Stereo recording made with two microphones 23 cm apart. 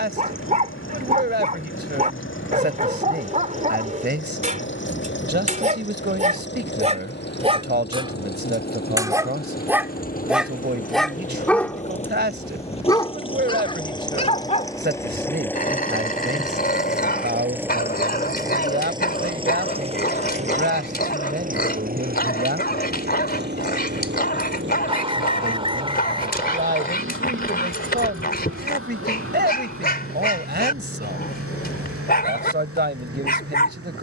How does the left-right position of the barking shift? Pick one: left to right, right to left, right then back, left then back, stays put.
right to left.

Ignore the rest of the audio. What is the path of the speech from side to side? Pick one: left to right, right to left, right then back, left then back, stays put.
stays put.